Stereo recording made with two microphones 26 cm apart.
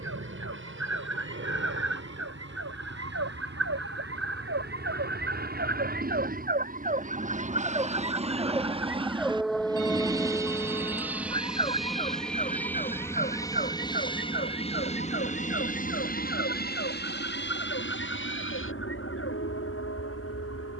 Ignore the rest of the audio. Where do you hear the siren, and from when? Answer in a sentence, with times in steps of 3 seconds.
You can hear the siren on the right from 0 s, in the centre from 9 s and on the left from 12 s.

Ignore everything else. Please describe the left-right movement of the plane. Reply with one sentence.
You can hear the plane go from the right side to the left.